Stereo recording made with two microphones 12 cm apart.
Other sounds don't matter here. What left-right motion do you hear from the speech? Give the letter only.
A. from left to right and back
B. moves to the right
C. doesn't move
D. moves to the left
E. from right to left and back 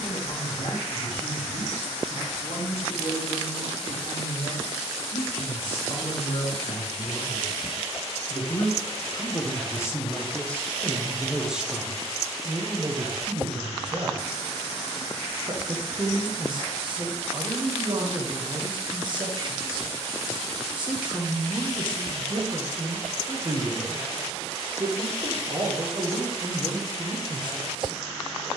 B.